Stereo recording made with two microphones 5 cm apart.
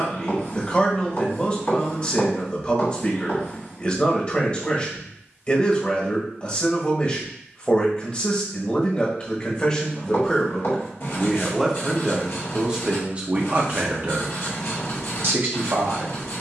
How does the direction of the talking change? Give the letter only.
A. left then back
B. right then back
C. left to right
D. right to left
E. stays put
C.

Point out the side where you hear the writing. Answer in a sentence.
In this clip you hear the writing on the left.